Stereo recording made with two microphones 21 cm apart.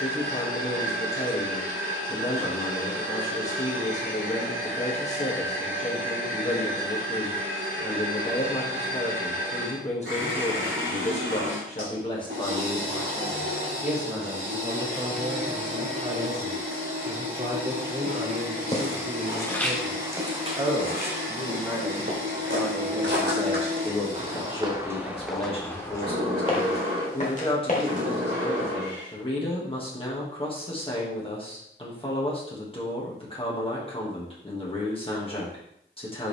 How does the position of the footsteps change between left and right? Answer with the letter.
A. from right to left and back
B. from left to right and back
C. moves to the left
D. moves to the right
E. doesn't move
B.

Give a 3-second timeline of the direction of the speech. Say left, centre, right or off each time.
left, left, left, left, centre, right, right, centre, left, left, left, left.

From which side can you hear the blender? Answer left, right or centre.
right.